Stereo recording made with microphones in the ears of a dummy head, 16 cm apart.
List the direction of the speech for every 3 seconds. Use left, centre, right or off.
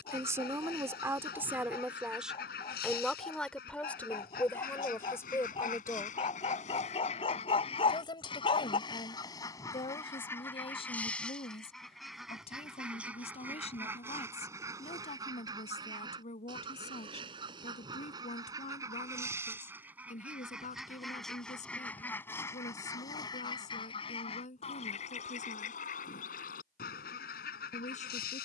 centre, centre, left, left, left, left, left, left, left, left.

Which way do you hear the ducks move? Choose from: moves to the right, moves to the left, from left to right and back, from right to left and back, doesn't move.
from left to right and back.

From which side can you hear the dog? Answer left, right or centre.
left.